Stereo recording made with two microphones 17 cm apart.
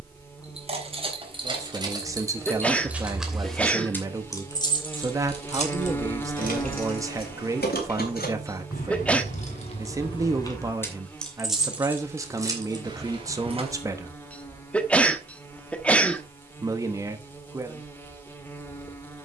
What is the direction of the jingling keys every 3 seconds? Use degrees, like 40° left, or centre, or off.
20° right, 20° left, 60° left, 20° left, 30° right, off, off.